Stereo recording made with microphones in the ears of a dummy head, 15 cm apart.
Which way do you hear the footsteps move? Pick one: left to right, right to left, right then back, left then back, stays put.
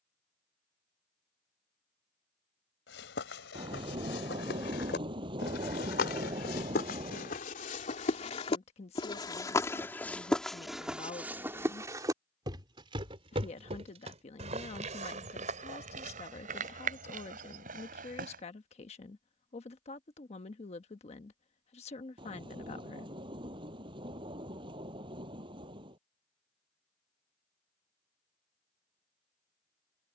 left to right.